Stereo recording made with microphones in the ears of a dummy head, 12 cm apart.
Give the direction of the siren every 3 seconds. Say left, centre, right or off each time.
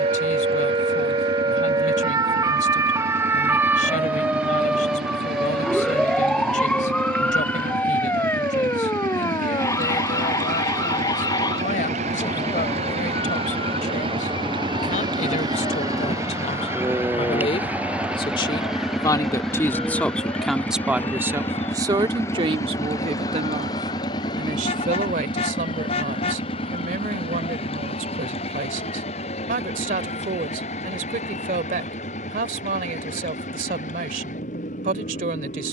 right, centre, centre, left, left, left, left, left, left, left, left, left.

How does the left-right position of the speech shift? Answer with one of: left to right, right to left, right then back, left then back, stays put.
left to right.